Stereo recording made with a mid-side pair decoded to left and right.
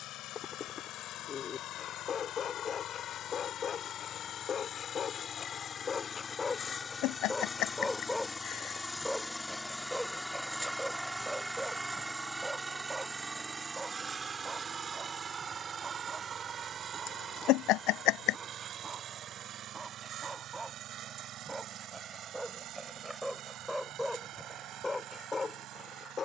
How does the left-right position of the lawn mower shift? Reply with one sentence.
You can hear the lawn mower move to the right.